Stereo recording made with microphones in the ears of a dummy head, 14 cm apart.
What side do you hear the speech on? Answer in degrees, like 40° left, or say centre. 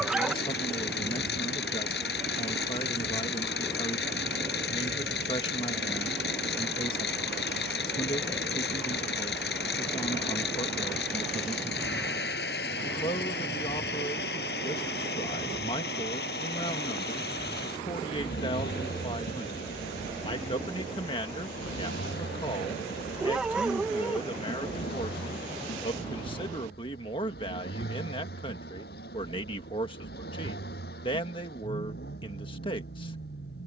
30° left.